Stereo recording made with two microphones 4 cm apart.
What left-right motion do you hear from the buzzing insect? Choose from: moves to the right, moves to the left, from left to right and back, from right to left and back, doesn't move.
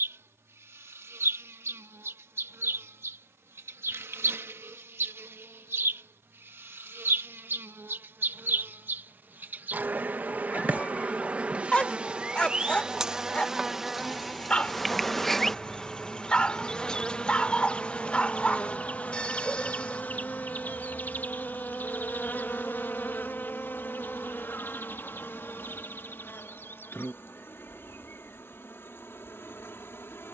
moves to the left.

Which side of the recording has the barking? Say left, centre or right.
left.